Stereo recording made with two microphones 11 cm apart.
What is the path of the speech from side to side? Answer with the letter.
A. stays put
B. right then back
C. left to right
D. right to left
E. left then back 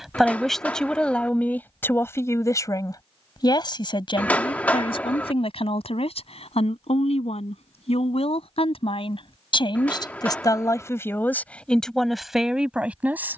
E.